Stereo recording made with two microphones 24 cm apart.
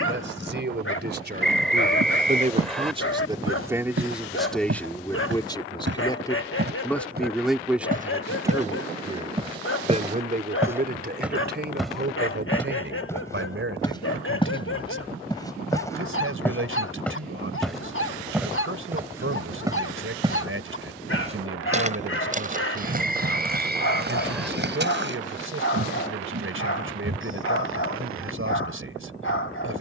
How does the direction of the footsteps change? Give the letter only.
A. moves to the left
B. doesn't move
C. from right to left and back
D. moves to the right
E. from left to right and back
C.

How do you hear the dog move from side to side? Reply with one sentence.
You can hear the dog stay put.